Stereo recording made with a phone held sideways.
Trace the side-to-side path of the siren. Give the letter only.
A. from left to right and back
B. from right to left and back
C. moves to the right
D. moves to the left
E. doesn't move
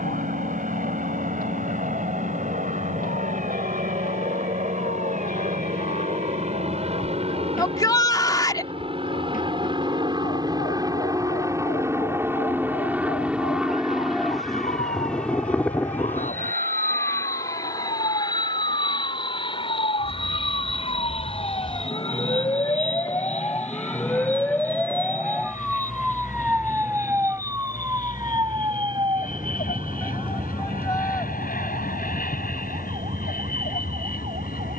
C.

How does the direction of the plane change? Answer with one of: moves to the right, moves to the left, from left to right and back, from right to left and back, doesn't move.
moves to the left.